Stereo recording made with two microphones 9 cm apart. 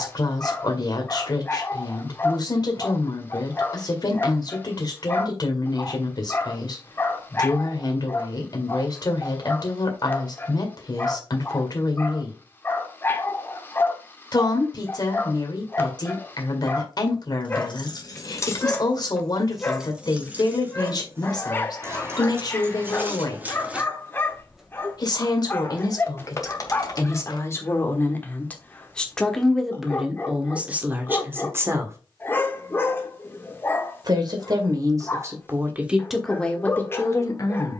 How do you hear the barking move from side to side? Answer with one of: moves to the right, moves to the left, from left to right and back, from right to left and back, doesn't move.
doesn't move.